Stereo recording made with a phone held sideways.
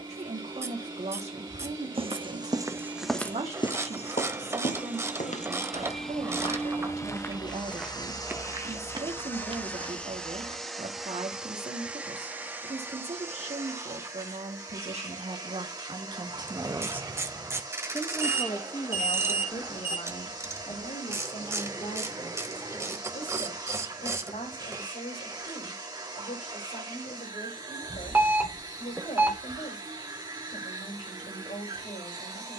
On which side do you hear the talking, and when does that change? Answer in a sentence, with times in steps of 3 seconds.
In this clip you hear the talking on the right from 0 s and on the left from 18 s.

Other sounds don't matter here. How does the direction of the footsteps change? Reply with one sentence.
In this clip you hear the footsteps go left and come back.